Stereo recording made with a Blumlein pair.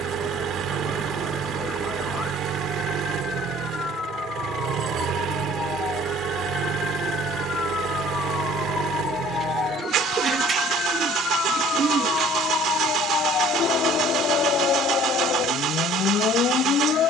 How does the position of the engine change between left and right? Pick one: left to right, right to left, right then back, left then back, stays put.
stays put.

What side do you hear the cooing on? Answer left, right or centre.
right.